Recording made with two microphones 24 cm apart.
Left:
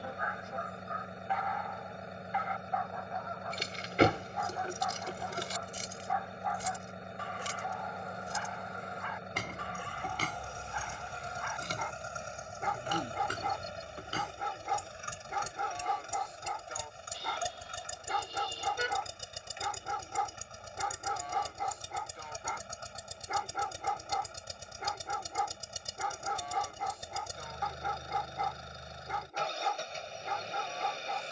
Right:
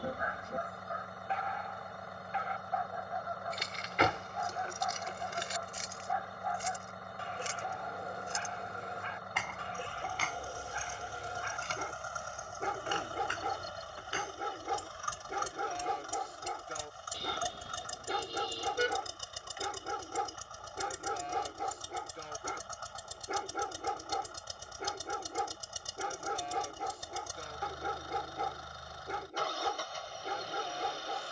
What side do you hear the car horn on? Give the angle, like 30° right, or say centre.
40° right.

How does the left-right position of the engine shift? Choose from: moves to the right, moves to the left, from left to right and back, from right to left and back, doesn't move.
doesn't move.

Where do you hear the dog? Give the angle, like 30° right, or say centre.
30° right.